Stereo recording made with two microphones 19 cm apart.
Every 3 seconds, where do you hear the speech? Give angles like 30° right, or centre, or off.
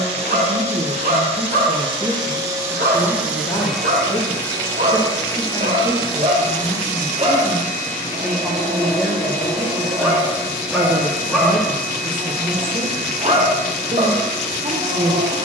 10° right, 30° left, 20° left, 20° right, 30° right.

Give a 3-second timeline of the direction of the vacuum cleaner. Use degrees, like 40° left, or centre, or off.
30° right, 10° left, 40° left, 50° left, 60° left.